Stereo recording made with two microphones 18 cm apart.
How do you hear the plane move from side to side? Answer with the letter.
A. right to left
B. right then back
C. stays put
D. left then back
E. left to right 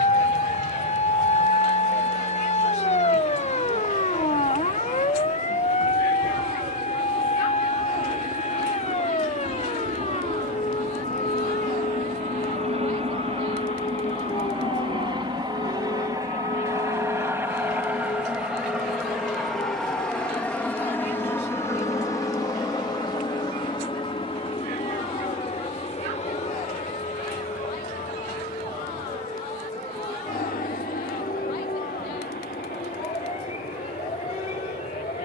A.